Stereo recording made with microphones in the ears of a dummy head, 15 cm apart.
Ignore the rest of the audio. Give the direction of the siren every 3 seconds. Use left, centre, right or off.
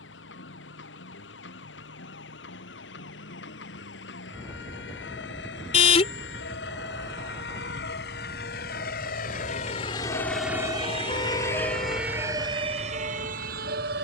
left, left, left, left, right.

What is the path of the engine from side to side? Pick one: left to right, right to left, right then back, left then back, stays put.
left to right.